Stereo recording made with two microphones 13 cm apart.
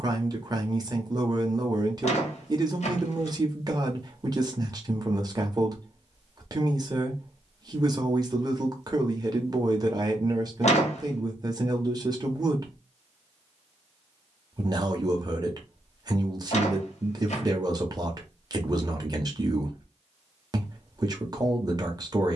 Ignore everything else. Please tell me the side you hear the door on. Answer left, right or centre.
left.